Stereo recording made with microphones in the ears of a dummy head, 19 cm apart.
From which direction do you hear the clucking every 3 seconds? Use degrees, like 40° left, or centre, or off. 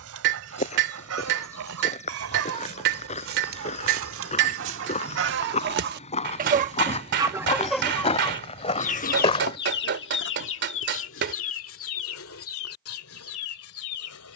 80° right, 60° right, centre, 60° left, 70° left.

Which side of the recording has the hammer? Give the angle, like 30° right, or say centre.
50° right.